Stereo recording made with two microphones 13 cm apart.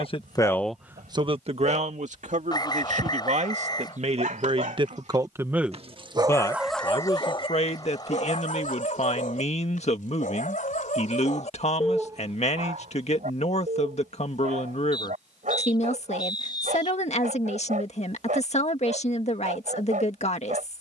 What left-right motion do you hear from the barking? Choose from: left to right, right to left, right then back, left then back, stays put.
left then back.